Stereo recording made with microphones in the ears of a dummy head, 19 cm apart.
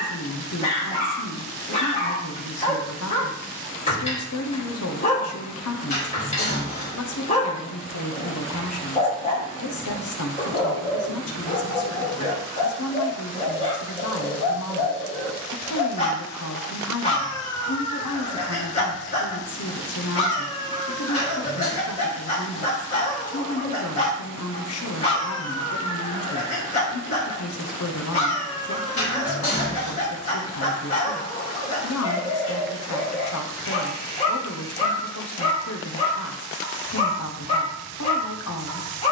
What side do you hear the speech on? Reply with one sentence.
In this clip you hear the speech on the left.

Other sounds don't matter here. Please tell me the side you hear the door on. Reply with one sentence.
You can hear the door on the left.